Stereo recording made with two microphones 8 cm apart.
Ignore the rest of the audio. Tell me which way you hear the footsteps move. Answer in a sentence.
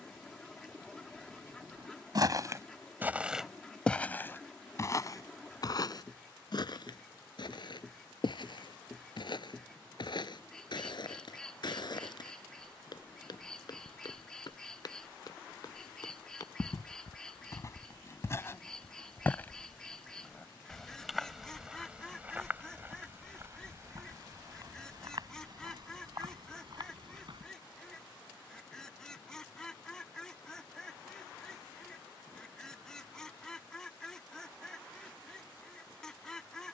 You can hear the footsteps go left and come back.